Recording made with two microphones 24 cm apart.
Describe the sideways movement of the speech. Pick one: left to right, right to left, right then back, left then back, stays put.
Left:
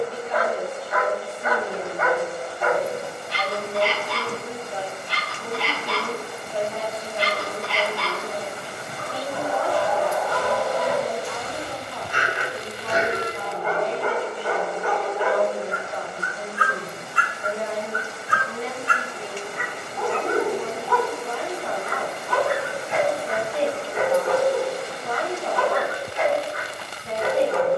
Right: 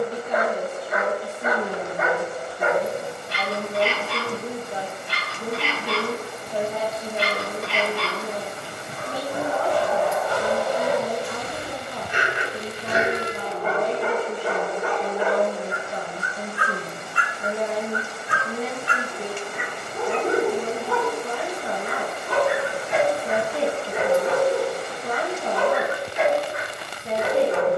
stays put.